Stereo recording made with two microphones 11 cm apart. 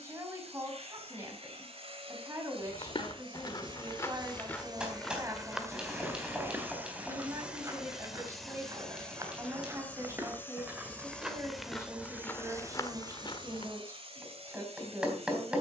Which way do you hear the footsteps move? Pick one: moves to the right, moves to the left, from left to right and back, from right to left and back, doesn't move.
from left to right and back.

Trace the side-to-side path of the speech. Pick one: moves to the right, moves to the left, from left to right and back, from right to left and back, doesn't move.
doesn't move.